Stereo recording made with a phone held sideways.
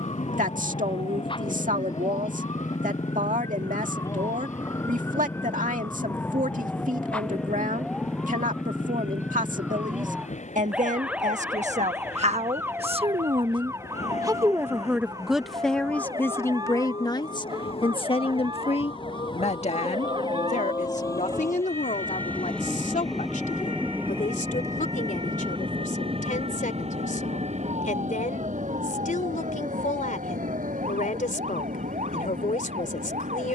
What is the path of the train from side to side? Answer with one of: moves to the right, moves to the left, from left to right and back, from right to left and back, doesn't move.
moves to the right.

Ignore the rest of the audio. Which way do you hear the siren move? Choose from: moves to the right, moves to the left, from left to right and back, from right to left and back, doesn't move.
moves to the right.